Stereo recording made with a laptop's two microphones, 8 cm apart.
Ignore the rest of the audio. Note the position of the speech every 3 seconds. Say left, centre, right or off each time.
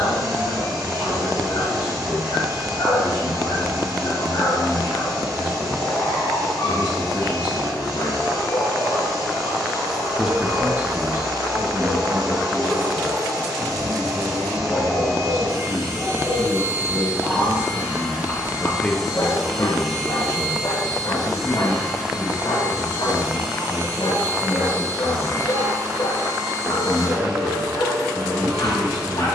left, left, left, right, right, right, left, left, left, left.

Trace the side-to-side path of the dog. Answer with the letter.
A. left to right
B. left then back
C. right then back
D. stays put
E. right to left
C.